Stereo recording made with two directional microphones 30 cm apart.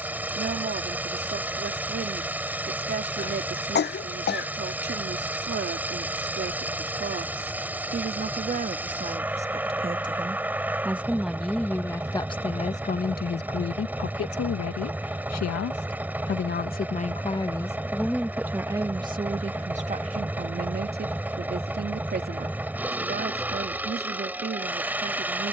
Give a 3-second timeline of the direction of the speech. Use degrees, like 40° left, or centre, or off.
30° right, 30° right, 30° right, 10° right, 40° left, 30° left, 20° right, 30° right, 30° right.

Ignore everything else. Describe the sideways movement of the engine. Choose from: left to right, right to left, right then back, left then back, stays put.
stays put.